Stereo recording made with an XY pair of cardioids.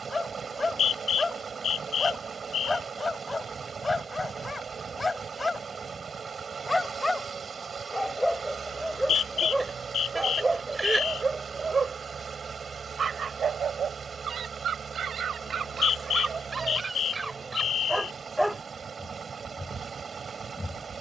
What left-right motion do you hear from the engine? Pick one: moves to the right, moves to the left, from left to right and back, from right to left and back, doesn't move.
doesn't move.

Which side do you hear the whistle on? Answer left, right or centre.
left.